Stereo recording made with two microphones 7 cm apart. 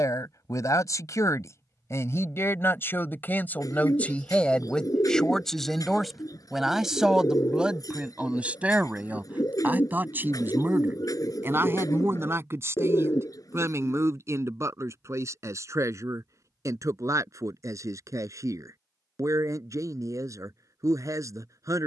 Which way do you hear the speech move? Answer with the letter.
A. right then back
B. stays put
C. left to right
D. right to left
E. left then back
C.